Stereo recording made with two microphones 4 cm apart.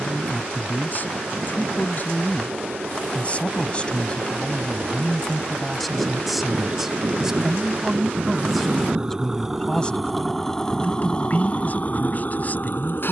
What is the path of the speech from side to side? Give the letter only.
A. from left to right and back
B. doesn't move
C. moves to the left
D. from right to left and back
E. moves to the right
A.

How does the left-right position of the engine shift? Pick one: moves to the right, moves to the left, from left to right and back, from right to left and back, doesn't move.
moves to the left.